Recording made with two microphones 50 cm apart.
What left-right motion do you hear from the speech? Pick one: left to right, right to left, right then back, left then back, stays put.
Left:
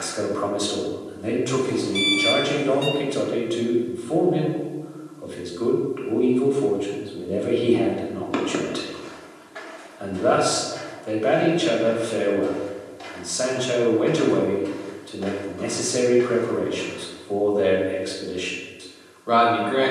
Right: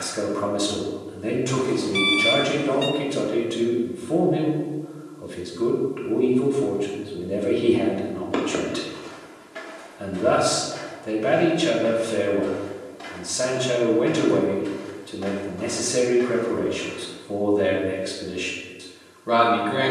stays put.